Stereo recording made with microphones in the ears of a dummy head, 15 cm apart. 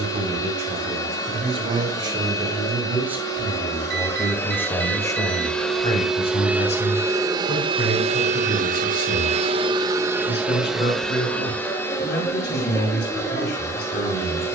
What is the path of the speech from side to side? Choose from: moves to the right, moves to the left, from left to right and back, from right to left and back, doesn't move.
moves to the left.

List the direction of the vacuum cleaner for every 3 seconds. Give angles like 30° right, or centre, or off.
20° left, 10° left, 30° right, 10° right, 20° left.